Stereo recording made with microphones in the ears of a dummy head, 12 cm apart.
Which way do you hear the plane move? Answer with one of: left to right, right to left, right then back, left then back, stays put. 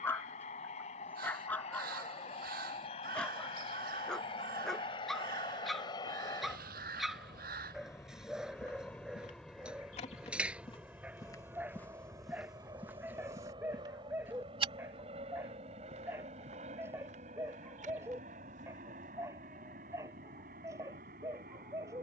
left to right.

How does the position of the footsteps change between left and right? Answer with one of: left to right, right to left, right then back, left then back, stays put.
left to right.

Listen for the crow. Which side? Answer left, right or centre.
right.